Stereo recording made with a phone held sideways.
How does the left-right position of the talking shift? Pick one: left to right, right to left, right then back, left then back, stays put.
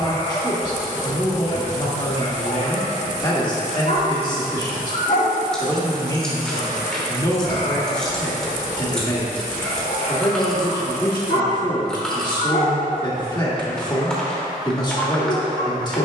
stays put.